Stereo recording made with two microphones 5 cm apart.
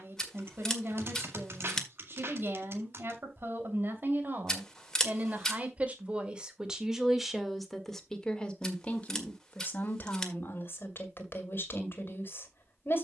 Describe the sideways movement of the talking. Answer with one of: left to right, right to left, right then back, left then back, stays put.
right to left.